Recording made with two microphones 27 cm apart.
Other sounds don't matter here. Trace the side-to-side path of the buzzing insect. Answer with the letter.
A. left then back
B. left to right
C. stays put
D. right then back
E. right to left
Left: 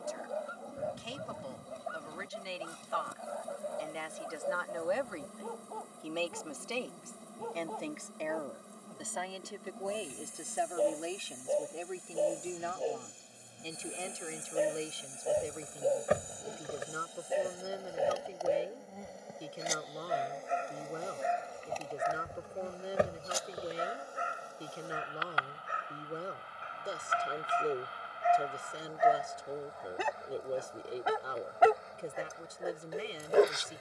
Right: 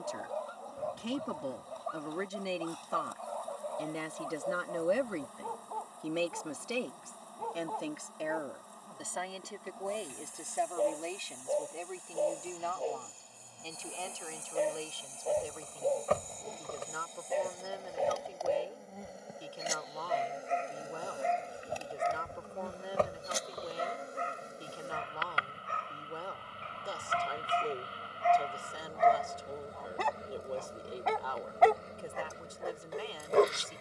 B.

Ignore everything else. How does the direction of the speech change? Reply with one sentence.
You can hear the speech go from the right side to the left.